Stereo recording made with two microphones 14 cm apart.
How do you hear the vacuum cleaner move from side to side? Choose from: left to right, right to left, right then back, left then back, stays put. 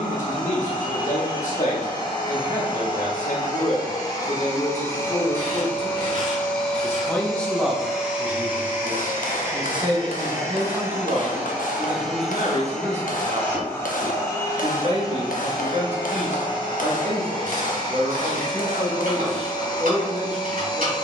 right then back.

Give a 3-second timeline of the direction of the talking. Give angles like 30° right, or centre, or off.
60° left, 50° left, centre, 40° right, 50° right, 50° right, 50° right.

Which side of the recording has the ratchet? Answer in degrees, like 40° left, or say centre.
70° right.